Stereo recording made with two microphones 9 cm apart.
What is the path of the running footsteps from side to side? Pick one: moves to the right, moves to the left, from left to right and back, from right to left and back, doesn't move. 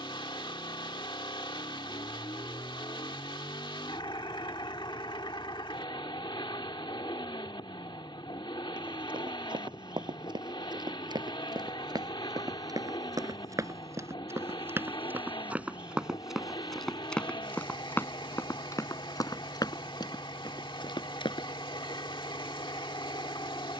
moves to the left.